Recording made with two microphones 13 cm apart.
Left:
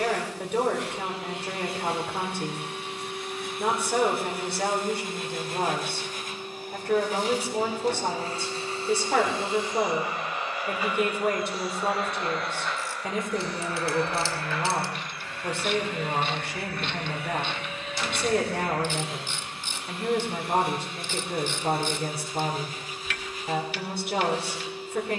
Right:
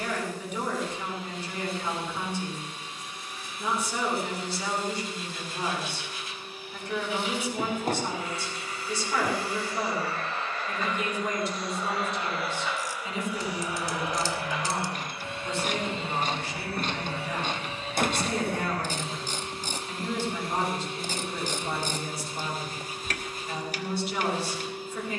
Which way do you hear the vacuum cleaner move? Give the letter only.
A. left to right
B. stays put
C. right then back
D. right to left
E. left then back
A.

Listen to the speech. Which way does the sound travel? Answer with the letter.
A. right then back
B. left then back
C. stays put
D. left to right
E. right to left
C.